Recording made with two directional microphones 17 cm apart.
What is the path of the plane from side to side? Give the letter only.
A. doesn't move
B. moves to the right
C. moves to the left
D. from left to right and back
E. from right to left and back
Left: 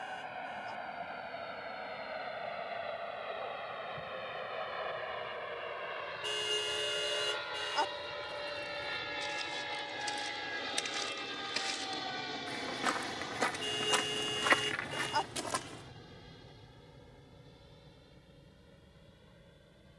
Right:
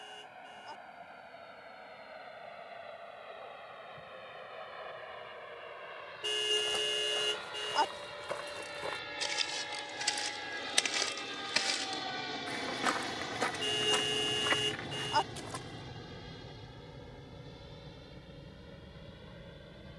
B.